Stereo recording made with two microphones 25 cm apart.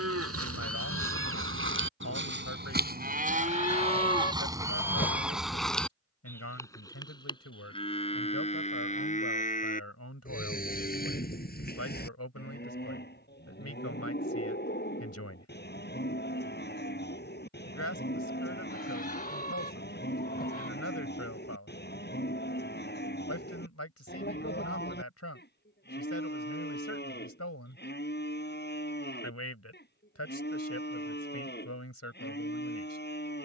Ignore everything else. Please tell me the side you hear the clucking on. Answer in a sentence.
You can hear the clucking on the left.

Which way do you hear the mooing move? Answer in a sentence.
In this clip you hear the mooing travel towards the left.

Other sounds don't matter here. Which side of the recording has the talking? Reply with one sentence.
You can hear the talking on the left.